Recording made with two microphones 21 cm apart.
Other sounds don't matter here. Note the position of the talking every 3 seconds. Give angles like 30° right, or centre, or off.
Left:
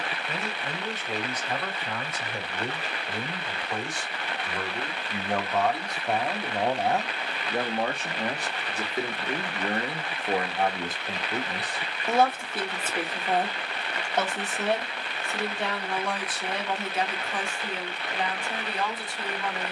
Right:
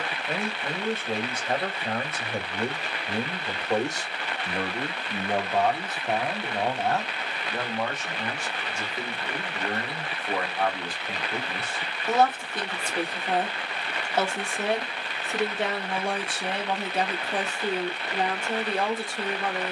50° right, 30° right, 20° left, 20° left, centre, 30° right, 50° right.